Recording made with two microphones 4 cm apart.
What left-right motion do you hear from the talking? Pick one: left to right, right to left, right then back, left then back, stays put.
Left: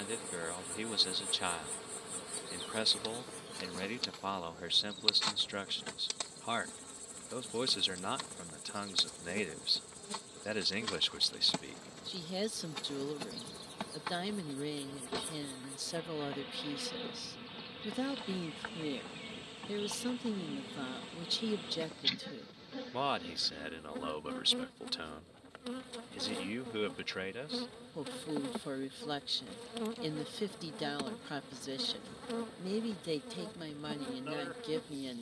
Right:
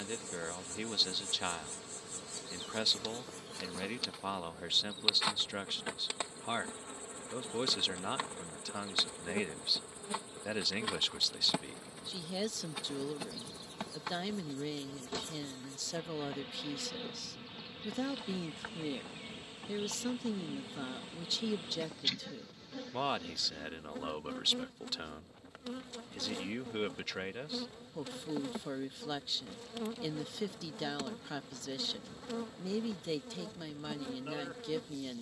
stays put.